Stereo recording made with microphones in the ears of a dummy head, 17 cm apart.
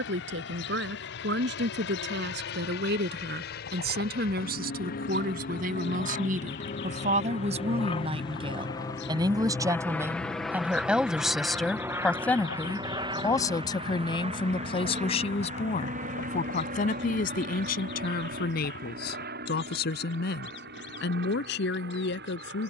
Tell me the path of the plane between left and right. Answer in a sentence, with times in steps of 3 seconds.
In this clip you hear the plane on the left from 0 s, in the centre from 9 s and on the right from 12 s.